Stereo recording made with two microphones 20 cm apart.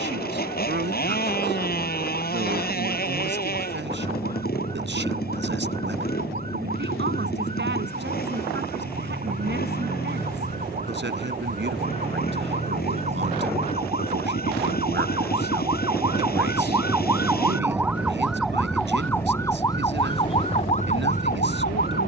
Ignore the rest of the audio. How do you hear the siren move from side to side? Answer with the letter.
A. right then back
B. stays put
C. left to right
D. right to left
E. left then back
D.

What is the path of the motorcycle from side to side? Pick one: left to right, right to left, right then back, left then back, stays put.
stays put.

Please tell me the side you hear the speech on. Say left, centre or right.
right.